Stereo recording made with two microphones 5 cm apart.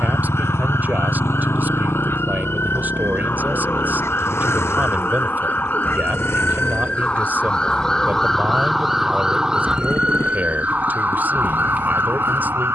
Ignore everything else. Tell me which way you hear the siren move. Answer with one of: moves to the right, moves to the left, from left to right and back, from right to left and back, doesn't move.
moves to the right.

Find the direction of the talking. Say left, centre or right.
right.